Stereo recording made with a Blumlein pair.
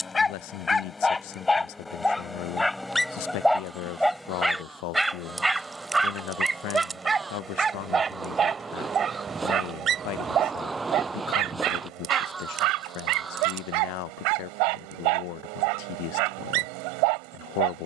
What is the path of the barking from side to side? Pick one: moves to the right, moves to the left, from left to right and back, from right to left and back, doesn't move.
moves to the right.